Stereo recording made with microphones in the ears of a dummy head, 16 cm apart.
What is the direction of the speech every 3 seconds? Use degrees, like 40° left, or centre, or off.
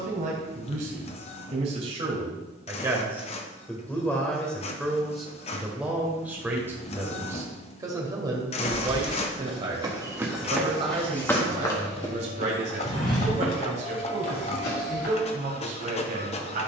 40° right, centre, 20° right, 30° right, 40° right, 40° right.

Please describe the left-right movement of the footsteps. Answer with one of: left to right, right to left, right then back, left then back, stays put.
right to left.